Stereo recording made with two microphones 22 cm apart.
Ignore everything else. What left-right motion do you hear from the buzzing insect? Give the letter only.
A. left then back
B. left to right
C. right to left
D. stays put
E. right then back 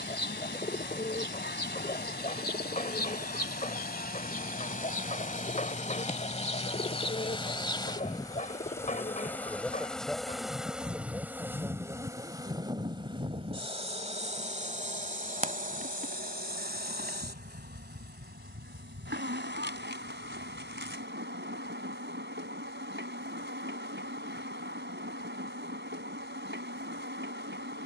B.